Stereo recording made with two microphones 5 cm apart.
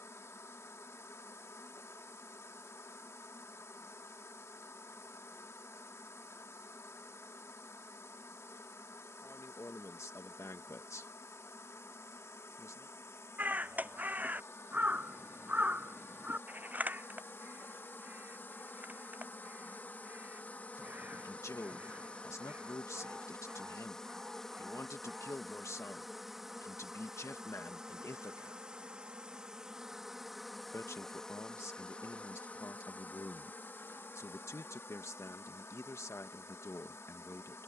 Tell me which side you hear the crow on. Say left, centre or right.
right.